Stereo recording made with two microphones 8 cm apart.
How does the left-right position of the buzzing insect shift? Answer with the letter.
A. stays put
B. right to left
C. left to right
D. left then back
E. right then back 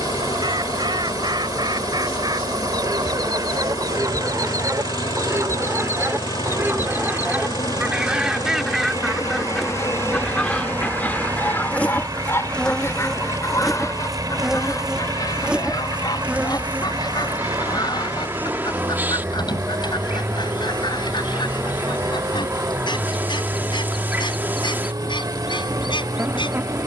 C.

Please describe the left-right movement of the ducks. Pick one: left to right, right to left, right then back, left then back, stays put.
right to left.